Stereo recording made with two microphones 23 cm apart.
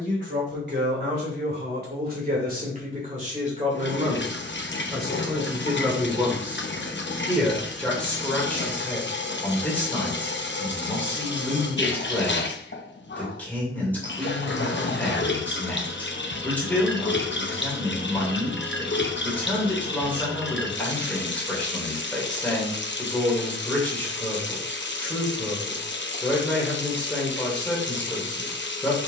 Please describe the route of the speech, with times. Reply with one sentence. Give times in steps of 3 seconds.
You can hear the speech on the right from 0 s and in the centre from 6 s.